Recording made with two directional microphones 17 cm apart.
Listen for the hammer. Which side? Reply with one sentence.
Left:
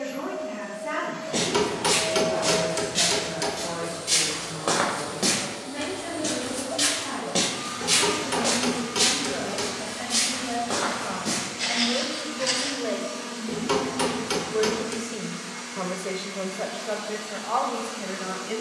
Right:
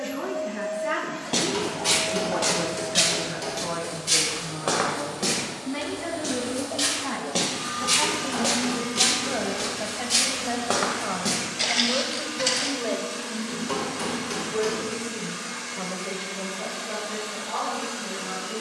In this clip you hear the hammer on the left.